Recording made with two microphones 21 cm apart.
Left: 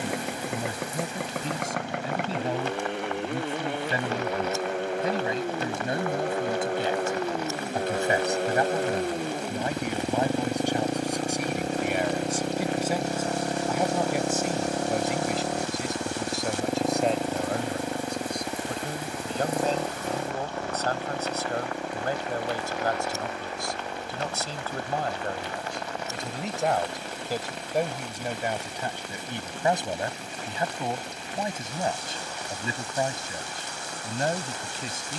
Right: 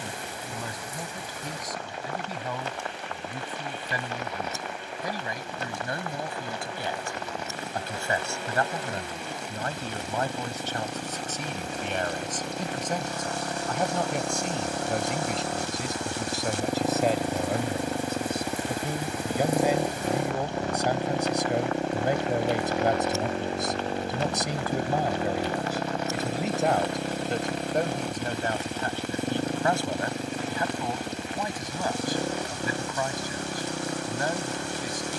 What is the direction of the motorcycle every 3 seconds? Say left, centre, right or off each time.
left, left, left, left, left, centre, centre, right, right, right, right, right.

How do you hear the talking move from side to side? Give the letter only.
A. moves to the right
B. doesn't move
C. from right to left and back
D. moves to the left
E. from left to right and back
E.